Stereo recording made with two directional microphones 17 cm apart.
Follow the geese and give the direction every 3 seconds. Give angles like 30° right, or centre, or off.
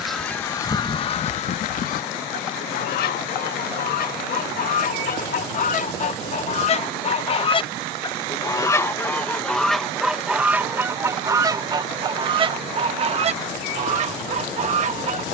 40° left, 60° left, 30° left, 10° right, 40° right.